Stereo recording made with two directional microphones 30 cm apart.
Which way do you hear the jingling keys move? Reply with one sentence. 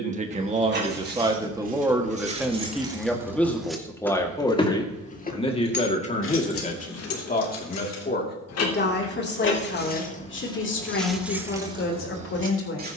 In this clip you hear the jingling keys go left and come back.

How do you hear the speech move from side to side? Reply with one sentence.
In this clip you hear the speech go from the right side to the left.